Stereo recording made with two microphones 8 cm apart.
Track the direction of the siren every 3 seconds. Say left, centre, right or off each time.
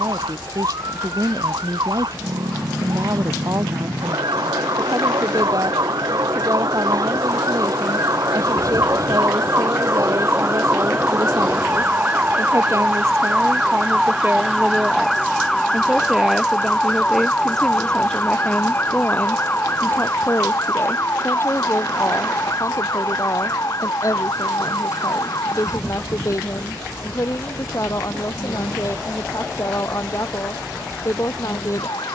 right, right, right, right, centre, centre, left, left, left, left, left.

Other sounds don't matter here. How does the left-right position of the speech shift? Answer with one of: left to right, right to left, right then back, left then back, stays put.
right to left.